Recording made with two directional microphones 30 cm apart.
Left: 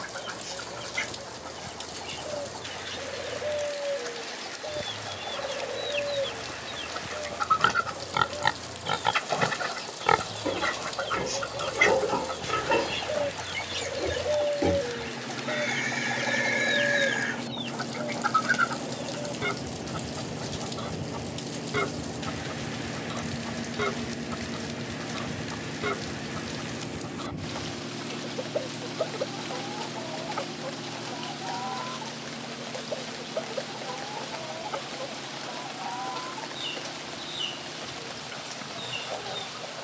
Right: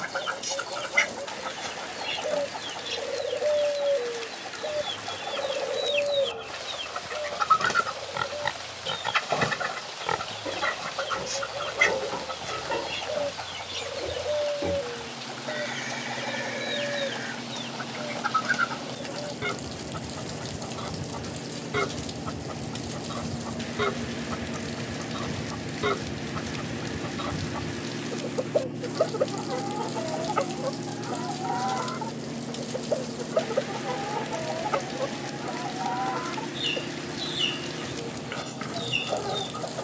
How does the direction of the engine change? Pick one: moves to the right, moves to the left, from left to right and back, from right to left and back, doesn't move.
moves to the right.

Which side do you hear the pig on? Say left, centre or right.
left.